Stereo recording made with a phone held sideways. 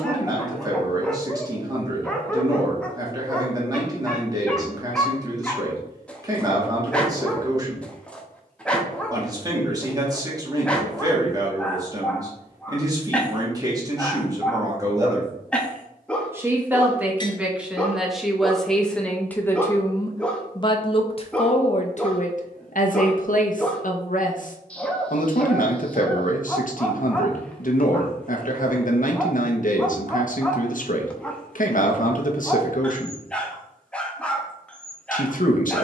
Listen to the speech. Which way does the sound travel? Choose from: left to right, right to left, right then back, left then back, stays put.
right to left.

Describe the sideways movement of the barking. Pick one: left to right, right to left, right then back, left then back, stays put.
stays put.